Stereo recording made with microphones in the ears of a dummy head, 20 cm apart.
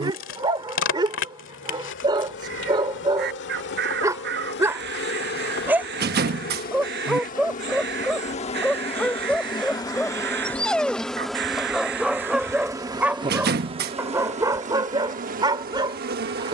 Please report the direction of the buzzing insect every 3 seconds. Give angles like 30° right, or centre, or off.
60° left, 50° left, 40° left, 10° left, 20° right, 40° right.